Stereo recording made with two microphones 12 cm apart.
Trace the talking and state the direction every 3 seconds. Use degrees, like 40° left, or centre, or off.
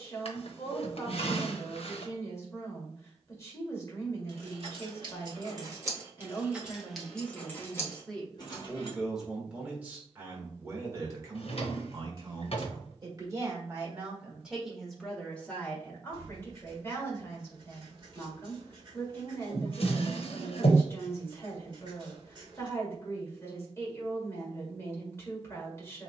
20° left, 20° left, 10° left, 20° right, 20° right, 20° left, 20° left, 20° left, 20° left.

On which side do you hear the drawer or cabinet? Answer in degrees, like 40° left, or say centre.
60° left.